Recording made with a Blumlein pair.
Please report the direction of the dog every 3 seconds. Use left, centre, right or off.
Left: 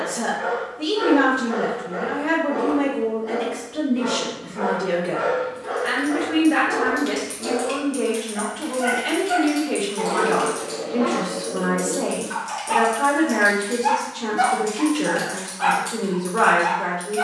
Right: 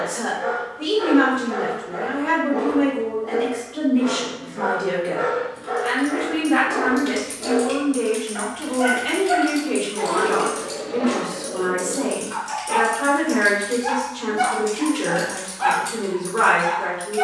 left, left, centre, centre, left, left.